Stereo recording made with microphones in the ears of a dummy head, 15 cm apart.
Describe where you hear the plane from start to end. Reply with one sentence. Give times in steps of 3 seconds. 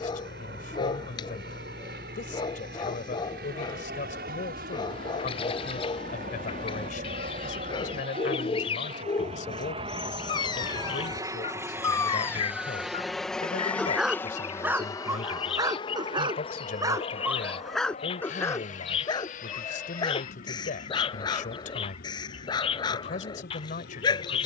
You can hear the plane on the right from 0 s, in the centre from 12 s and on the left from 15 s.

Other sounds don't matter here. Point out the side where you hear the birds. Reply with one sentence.
You can hear the birds on the left.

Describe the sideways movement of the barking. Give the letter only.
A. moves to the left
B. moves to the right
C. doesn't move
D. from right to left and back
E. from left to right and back
E.